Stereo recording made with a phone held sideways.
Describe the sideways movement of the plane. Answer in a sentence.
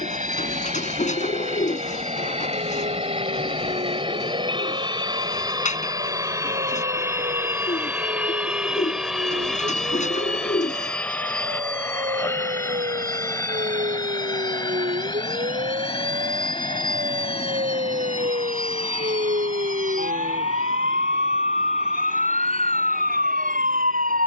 You can hear the plane go from the right side to the left.